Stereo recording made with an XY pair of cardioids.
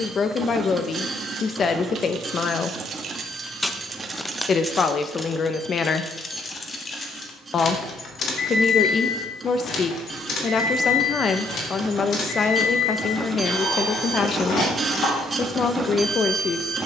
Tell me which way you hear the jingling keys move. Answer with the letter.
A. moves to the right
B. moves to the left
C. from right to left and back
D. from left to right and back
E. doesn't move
B.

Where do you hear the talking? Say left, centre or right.
left.